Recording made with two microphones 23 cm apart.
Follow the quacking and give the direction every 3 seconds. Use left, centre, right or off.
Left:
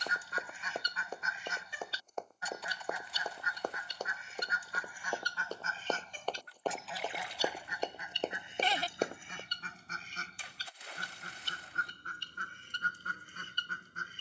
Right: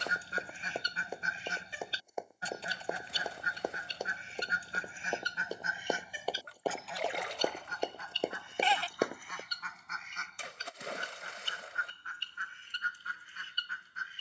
right, right, centre, left, left.